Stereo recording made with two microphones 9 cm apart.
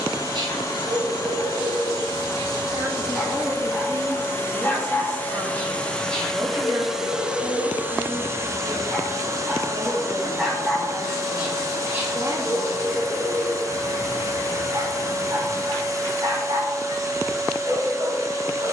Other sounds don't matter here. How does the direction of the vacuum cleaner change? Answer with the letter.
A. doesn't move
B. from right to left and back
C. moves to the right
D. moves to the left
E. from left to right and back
C.